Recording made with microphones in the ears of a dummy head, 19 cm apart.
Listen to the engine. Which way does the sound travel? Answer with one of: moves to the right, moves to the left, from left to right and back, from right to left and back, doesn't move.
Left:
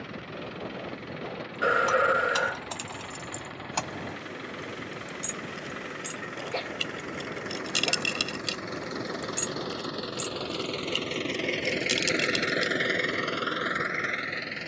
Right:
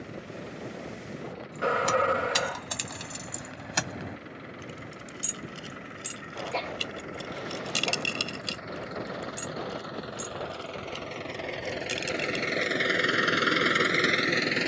moves to the right.